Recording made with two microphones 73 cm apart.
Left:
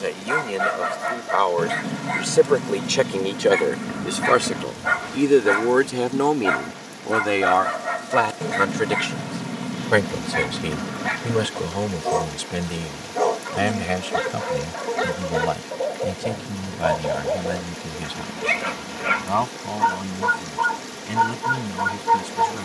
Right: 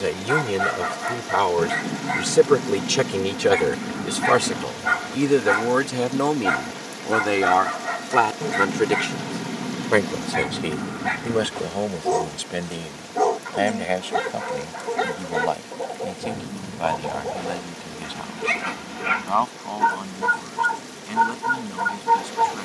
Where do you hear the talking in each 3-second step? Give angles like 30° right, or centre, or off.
60° right, 30° right, centre, 30° left, 40° left, 50° left, 50° left, 60° left.